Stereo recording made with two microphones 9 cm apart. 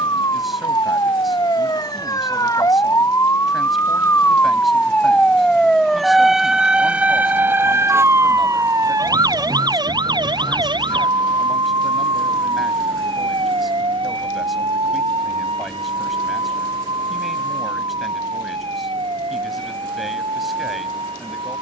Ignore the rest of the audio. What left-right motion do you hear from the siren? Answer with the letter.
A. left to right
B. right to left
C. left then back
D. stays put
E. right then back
A.